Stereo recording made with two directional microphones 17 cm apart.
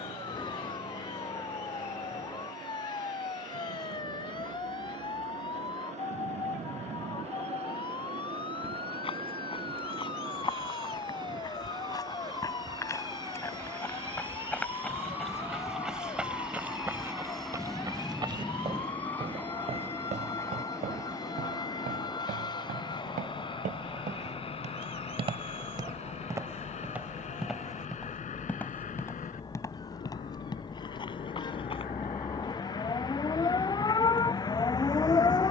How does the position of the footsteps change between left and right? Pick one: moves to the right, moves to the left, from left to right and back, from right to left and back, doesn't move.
from left to right and back.